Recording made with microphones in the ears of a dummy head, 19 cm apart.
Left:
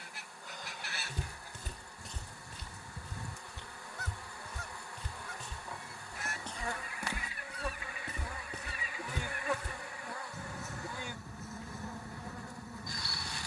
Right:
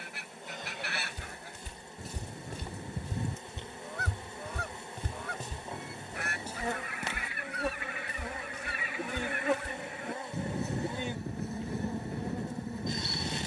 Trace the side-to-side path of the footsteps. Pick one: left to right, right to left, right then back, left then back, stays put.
right then back.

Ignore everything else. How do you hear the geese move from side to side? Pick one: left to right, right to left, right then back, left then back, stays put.
stays put.